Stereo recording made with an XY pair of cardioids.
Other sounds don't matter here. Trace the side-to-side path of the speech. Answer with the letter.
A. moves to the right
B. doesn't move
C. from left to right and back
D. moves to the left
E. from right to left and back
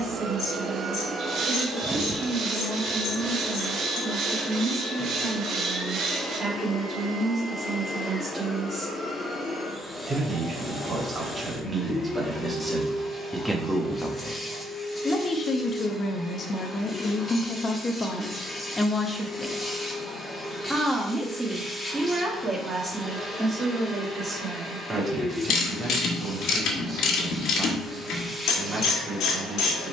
E.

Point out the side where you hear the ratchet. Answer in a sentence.
You can hear the ratchet on the left.